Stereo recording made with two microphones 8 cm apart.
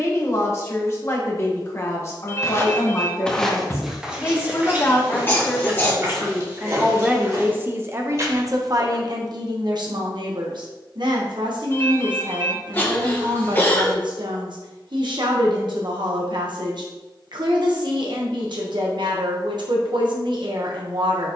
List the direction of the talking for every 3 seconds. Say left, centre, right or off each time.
left, left, right, right, right, right, right.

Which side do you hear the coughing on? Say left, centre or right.
left.